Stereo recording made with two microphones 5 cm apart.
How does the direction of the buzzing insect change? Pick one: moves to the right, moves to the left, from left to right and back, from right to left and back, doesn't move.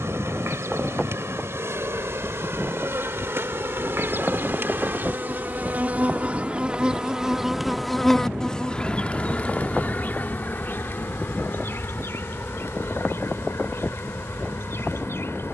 moves to the left.